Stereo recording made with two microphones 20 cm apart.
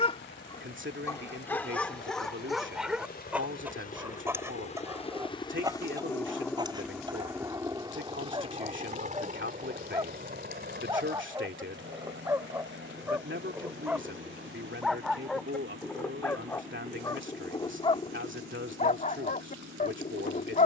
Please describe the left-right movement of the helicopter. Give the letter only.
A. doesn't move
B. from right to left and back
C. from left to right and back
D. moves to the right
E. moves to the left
D.